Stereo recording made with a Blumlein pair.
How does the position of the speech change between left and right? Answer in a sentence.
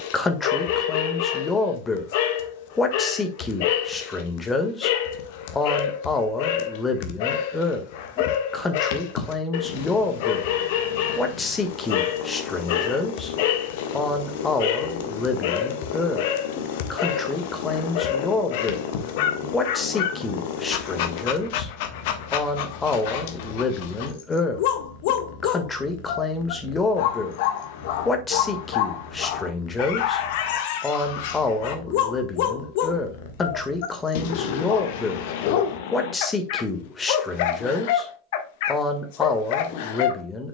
In this clip you hear the speech stay in one place.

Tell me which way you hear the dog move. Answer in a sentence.
You can hear the dog stay in one place.